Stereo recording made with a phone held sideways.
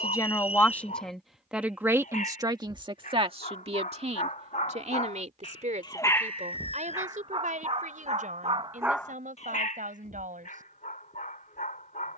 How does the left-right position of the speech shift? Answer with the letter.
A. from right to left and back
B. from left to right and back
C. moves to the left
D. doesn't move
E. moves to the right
E.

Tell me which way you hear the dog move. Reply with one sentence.
In this clip you hear the dog move from left to right and back again.